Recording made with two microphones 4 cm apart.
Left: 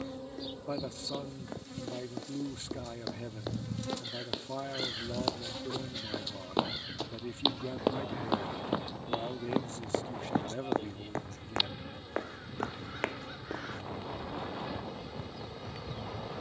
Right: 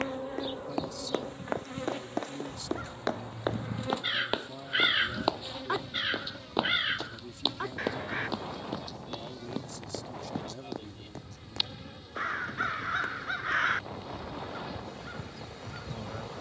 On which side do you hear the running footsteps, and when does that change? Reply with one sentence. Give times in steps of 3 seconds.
You can hear the running footsteps on the right from 0 s, in the centre from 6 s, on the left from 9 s and not at all from 15 s.